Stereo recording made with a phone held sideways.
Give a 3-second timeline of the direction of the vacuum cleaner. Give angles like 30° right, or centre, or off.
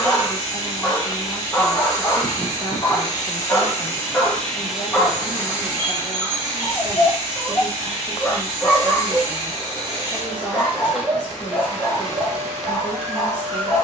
30° left, centre, 40° right, 10° right, 20° left.